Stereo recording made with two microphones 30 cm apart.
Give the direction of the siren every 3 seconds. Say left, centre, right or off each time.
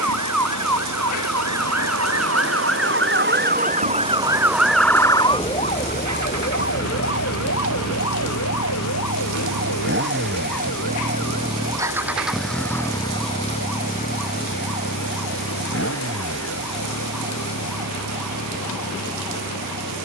right, centre, left, left, left, left, left.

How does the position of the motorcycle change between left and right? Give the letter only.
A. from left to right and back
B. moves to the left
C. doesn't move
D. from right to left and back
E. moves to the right
B.